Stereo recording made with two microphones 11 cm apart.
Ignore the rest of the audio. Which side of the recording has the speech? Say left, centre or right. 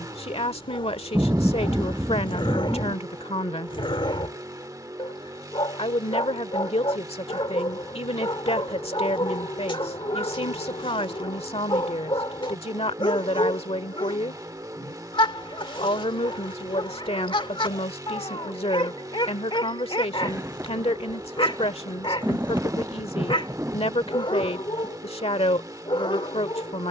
left.